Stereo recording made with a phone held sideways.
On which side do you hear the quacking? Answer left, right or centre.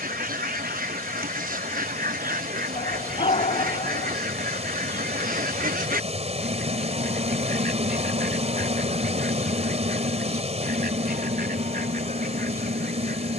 right.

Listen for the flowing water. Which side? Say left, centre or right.
right.